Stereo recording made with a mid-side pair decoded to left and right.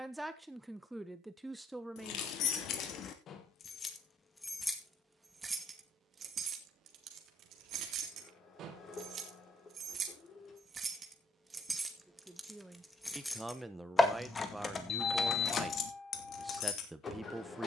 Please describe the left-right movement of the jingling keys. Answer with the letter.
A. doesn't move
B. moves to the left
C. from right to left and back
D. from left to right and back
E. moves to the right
D.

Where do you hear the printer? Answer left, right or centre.
left.